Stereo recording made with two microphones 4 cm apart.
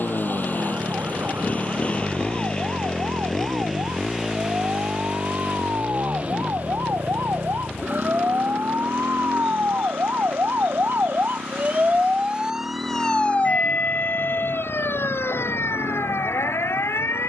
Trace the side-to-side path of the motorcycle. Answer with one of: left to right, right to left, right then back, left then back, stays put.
left to right.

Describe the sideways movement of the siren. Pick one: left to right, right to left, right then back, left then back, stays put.
right to left.